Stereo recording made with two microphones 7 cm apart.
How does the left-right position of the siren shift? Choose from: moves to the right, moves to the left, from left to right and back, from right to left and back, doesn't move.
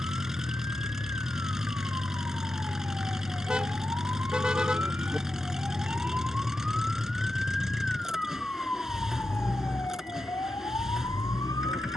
moves to the left.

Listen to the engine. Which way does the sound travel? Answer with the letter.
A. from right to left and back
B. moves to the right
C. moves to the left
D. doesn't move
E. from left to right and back
D.